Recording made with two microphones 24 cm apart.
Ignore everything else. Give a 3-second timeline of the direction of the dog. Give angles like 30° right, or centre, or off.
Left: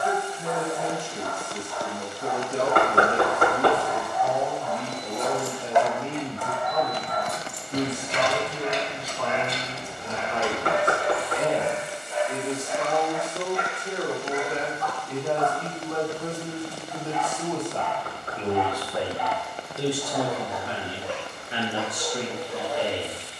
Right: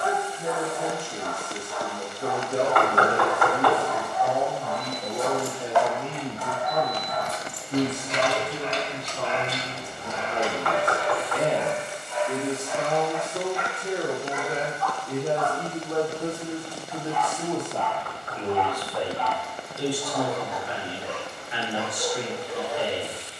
30° right, 30° right, 10° right, 30° left, 50° left, 30° left, 10° left, 20° right.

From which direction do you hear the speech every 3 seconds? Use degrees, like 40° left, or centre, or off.
70° right, 70° right, 70° right, 60° right, 50° right, 20° right, 20° left, 50° left.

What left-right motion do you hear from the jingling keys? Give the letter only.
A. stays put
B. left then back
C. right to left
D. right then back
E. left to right
B.